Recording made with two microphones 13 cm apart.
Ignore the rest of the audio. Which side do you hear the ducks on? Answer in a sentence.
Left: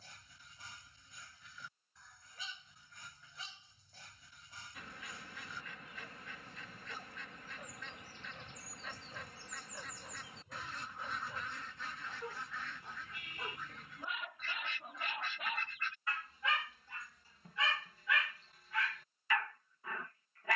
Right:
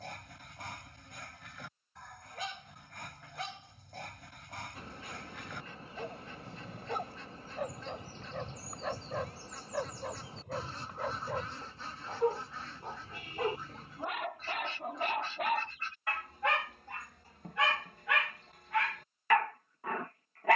You can hear the ducks on the right.